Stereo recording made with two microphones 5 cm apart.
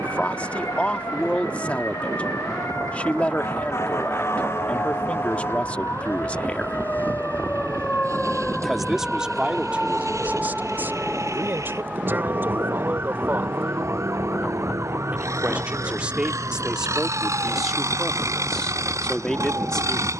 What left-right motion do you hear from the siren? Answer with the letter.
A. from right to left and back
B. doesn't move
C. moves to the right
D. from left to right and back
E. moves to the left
C.